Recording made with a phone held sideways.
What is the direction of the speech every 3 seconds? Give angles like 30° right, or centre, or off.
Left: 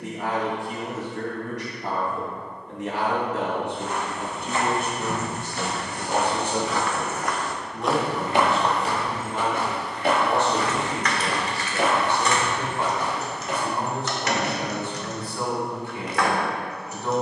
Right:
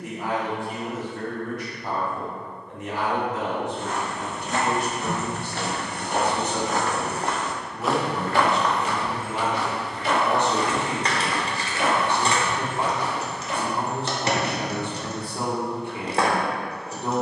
70° left, 50° left, 10° left, 20° right, 30° right, 30° right.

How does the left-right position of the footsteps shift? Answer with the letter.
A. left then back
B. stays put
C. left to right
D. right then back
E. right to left
E.